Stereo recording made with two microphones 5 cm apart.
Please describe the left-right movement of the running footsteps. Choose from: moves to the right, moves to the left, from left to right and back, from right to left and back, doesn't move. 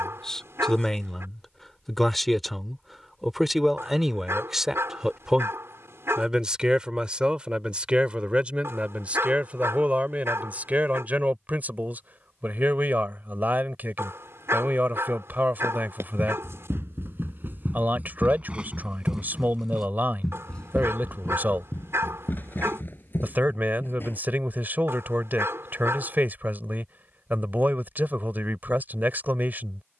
moves to the left.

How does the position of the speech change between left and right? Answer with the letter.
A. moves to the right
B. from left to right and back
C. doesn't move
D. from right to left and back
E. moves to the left
A.